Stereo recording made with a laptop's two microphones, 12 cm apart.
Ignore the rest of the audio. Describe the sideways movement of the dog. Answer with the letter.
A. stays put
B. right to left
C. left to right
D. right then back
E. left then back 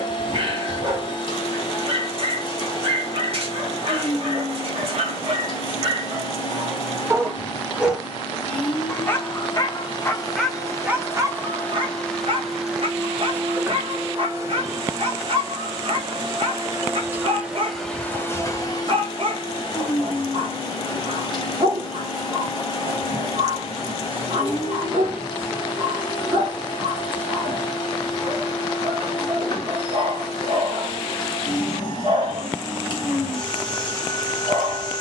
E.